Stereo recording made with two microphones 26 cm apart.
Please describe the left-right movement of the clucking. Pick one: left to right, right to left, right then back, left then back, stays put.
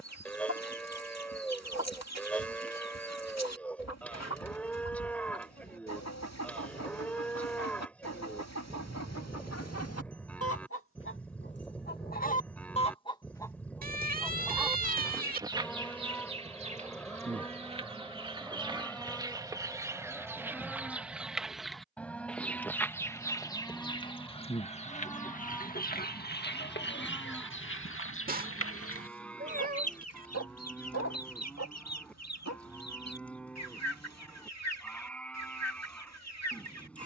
right then back.